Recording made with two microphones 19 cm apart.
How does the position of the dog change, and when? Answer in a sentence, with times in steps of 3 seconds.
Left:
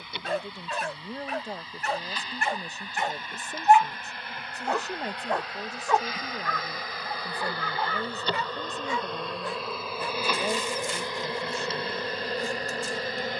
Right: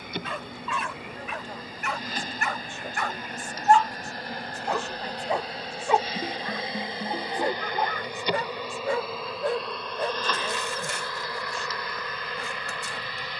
In this clip you hear the dog on the left from 0 s, in the centre from 3 s and on the right from 6 s.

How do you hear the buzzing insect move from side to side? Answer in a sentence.
In this clip you hear the buzzing insect go from the right side to the left.